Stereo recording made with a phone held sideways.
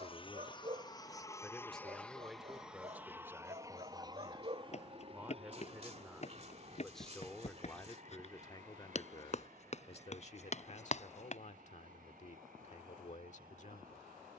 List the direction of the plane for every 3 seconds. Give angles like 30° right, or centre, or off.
20° left, 30° right, 50° right, 60° right, 70° right.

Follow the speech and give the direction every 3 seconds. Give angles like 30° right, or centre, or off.
10° left, 20° right, 20° left, 60° left, 60° left.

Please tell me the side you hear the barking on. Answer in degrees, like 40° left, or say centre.
50° right.